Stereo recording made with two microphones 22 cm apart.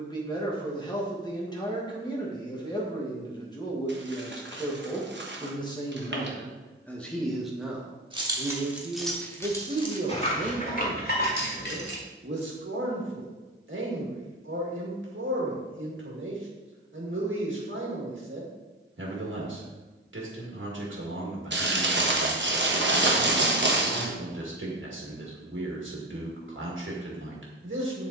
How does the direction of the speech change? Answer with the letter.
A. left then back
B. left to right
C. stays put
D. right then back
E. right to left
B.